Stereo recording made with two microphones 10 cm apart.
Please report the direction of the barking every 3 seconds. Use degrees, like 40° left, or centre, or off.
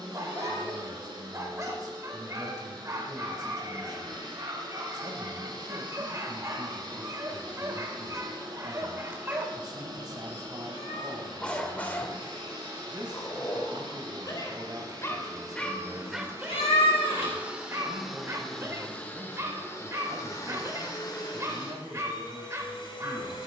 30° right, 30° right, 30° right, centre, 40° left, 10° right, 30° right, 30° right.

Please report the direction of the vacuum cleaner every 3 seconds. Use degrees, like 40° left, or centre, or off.
50° right, 50° right, 50° right, 50° right, 50° right, 30° right, 20° left, 50° left.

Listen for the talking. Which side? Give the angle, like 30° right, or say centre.
40° right.